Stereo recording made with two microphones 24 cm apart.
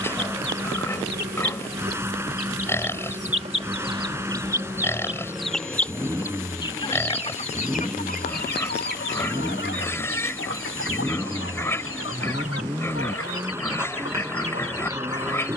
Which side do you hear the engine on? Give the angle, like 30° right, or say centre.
10° right.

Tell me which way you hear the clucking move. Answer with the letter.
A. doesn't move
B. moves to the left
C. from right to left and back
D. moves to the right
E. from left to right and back
B.